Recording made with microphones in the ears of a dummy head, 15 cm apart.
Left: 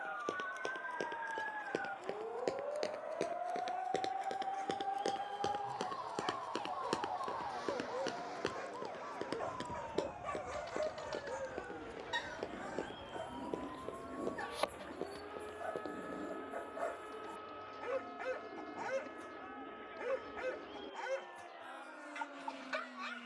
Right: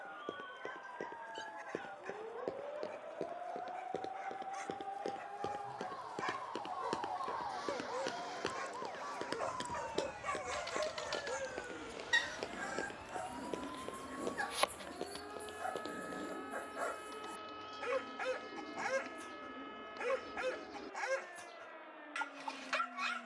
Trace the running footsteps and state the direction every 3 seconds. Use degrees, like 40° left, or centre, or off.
60° left, 40° left, centre, 40° right, 60° right, 60° right, off, off.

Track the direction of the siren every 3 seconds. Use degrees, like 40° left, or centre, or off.
60° left, 30° left, 20° right, 50° right, 60° right, 70° right, 80° right, 80° right.